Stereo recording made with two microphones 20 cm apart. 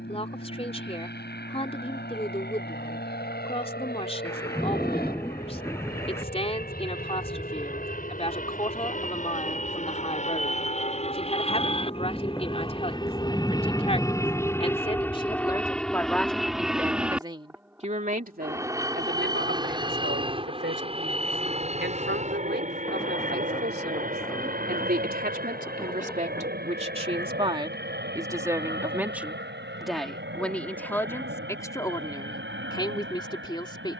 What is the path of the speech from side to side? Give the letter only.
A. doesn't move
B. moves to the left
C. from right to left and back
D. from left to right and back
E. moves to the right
D.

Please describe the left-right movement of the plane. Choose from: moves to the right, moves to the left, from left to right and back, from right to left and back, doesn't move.
moves to the right.